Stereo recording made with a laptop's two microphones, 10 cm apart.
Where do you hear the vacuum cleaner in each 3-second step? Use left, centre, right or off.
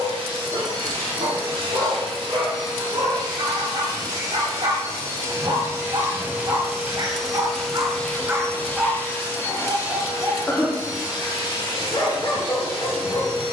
right, right, centre, left, left.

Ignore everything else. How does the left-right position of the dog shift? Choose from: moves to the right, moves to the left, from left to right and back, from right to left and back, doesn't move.
moves to the left.